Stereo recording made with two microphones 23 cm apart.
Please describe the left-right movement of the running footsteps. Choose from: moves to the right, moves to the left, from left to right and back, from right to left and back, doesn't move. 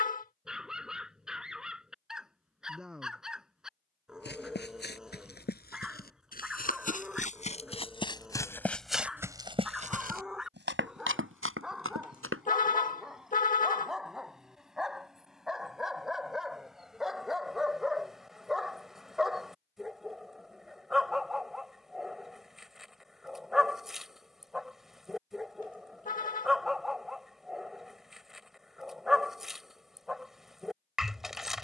moves to the right.